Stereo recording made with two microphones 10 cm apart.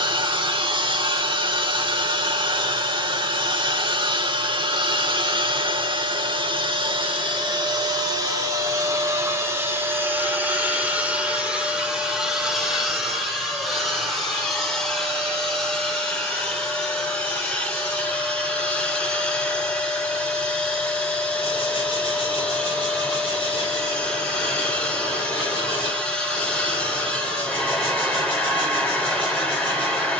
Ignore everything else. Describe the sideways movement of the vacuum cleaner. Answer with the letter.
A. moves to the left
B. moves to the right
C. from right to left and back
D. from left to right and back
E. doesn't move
A.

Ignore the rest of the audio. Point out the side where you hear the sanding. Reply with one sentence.
You can hear the sanding on the left.